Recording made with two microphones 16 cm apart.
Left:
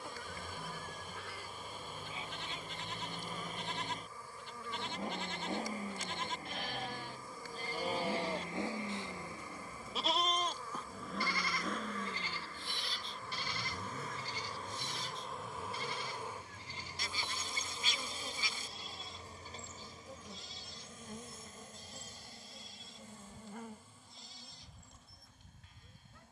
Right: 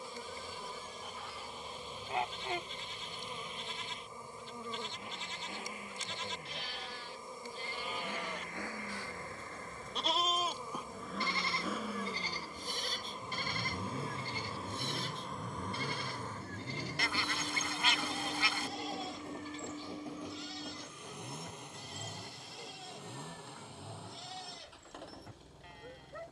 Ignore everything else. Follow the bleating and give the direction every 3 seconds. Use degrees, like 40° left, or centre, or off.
70° left, 60° left, 40° left, 10° right, 50° right, 70° right, 70° right, 80° right, 80° right.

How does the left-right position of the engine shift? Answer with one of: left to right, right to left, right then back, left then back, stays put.
left to right.